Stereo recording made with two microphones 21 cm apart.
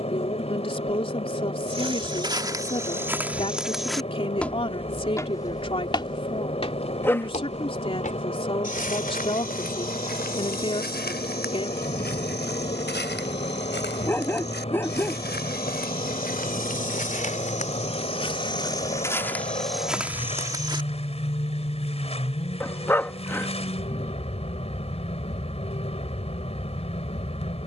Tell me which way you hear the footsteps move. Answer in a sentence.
In this clip you hear the footsteps go left and come back.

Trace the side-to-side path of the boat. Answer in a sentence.
In this clip you hear the boat stay put.